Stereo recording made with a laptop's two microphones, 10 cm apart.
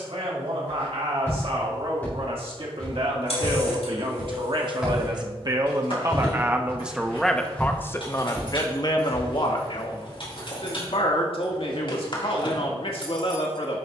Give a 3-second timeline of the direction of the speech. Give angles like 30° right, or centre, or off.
70° right, 50° right, 10° left, 60° left, 60° left.